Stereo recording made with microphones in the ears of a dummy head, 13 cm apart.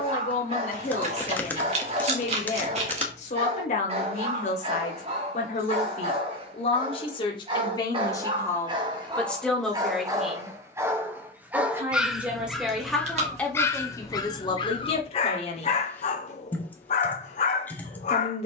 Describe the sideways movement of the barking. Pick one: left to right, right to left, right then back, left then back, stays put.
right to left.